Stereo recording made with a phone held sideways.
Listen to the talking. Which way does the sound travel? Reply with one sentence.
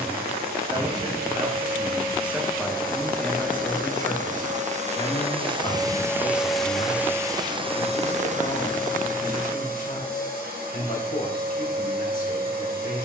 In this clip you hear the talking move to the left.